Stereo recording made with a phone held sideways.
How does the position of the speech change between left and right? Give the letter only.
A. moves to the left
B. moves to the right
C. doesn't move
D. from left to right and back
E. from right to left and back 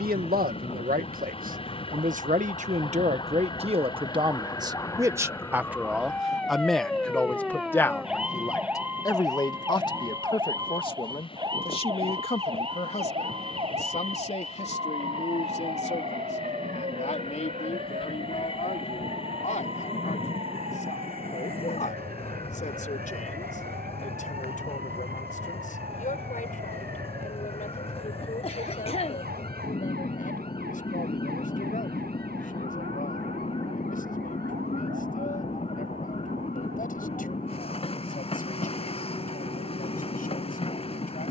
A.